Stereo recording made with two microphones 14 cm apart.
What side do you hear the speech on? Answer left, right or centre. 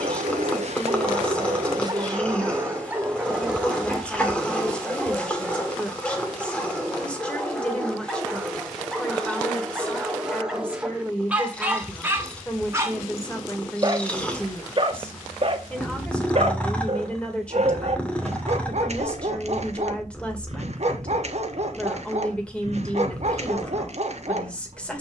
centre.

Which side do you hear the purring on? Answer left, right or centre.
centre.